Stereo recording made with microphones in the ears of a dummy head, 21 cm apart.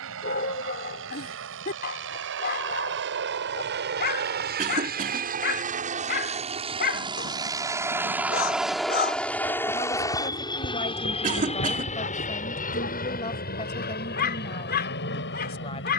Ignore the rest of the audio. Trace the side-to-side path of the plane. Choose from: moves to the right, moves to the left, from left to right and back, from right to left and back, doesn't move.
moves to the left.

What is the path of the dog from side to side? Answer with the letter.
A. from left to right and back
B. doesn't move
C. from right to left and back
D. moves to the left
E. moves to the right
B.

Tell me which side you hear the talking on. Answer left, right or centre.
left.